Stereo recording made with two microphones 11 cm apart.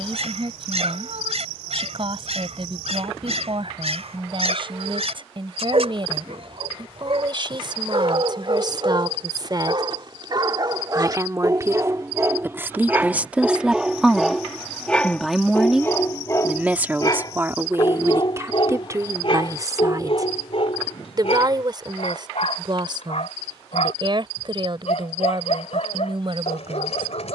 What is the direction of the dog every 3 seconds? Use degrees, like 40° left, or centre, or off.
70° right, 70° right, 60° right, 40° right, 10° right, 30° left, 50° left, 60° left, 70° left.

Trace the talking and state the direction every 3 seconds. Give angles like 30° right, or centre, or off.
50° right, 50° right, 40° right, 30° right, 10° right, 10° right, 30° right, 40° right, 50° right.